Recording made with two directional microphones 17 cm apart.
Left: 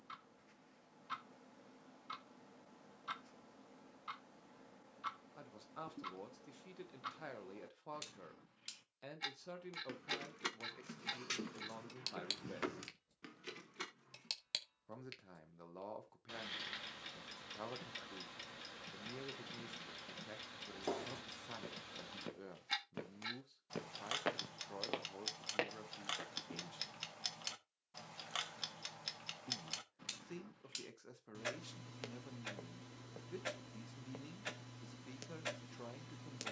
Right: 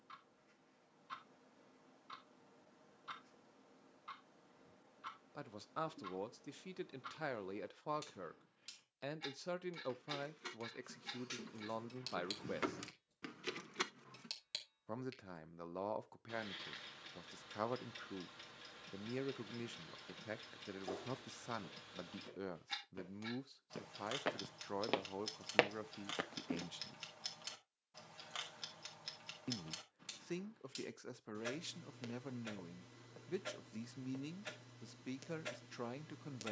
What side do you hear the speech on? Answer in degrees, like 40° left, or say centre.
40° right.